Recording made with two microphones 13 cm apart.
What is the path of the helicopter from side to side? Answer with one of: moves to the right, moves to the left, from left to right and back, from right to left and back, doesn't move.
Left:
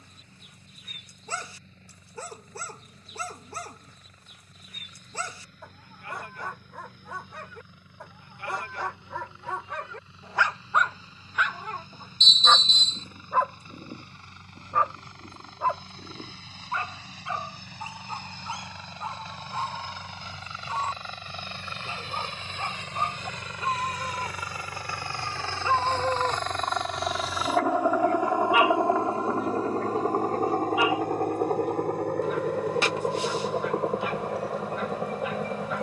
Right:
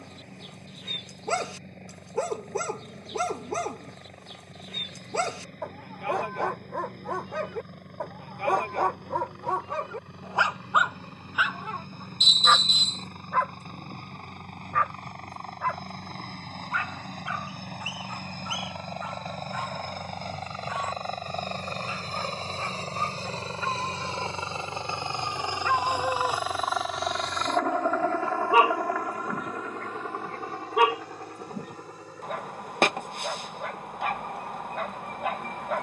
moves to the left.